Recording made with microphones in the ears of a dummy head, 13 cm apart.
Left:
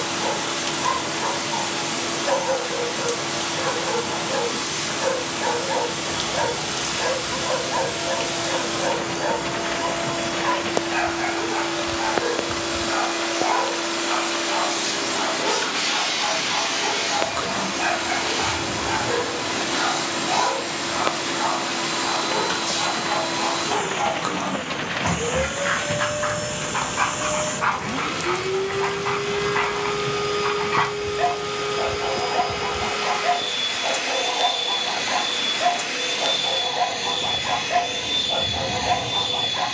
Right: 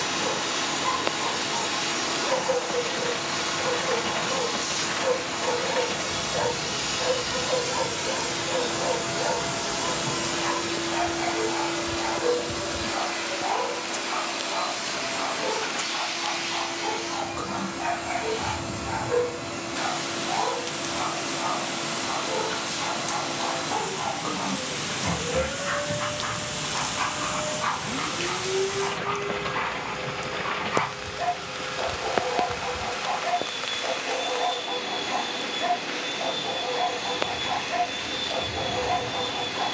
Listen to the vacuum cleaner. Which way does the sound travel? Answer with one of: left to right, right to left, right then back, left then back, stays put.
right to left.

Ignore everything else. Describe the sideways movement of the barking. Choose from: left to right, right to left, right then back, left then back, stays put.
stays put.